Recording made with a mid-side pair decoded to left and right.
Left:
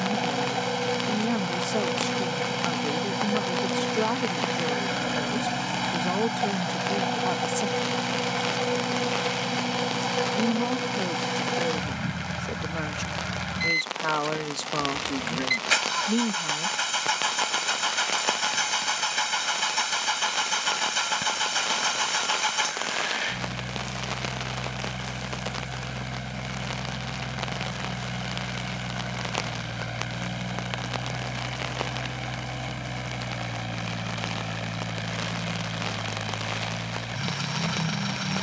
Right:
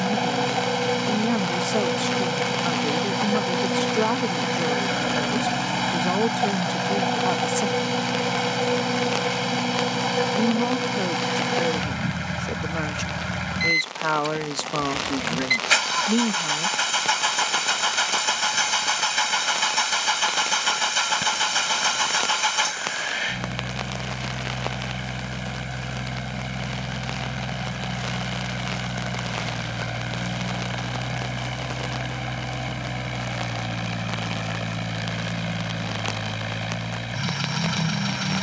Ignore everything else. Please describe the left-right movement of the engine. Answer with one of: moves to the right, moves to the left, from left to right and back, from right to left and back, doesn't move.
doesn't move.